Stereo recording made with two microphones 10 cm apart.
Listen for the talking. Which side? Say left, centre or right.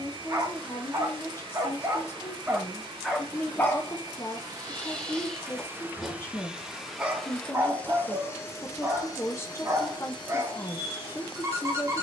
left.